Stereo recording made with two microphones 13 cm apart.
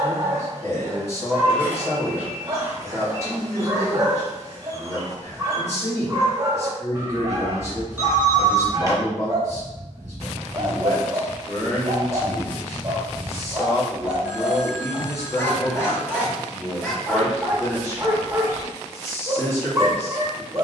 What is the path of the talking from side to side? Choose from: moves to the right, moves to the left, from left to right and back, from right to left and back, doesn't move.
doesn't move.